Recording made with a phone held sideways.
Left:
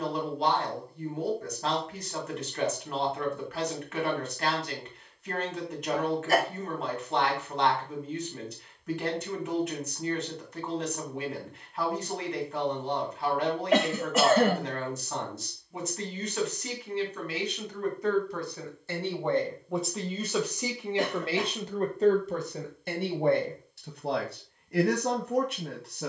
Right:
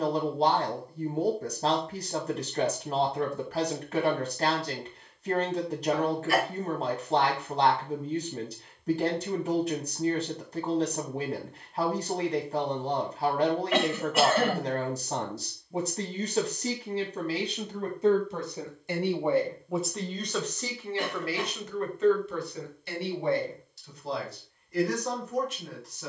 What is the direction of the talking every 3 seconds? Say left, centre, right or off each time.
right, right, right, right, right, right, centre, left, left.